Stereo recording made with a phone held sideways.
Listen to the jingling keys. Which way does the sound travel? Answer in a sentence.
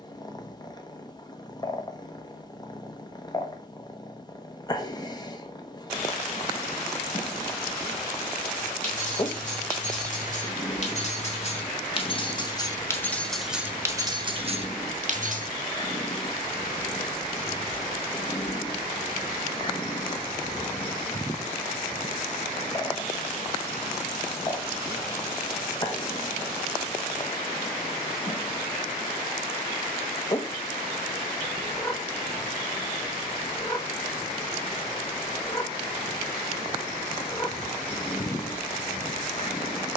In this clip you hear the jingling keys go from the left side to the right.